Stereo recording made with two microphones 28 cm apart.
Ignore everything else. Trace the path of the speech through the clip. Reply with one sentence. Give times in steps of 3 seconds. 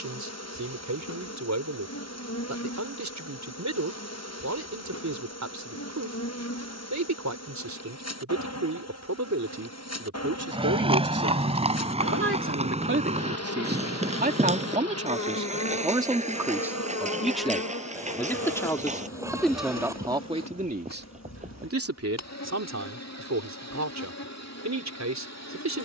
You can hear the speech on the right from 0 s, in the centre from 15 s and on the right from 21 s.